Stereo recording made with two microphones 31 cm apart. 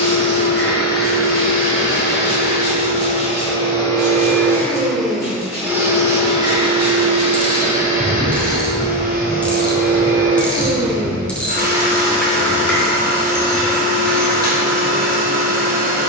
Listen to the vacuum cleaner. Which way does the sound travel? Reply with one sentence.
You can hear the vacuum cleaner go from the left side to the right.